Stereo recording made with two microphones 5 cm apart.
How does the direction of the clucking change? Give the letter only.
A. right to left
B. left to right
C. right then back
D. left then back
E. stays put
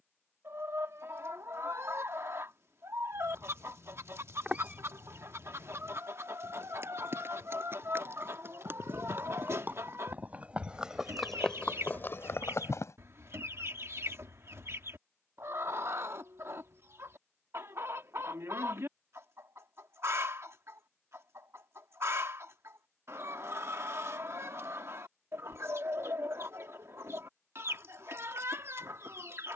E.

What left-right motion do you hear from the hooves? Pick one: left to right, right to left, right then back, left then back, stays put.
right to left.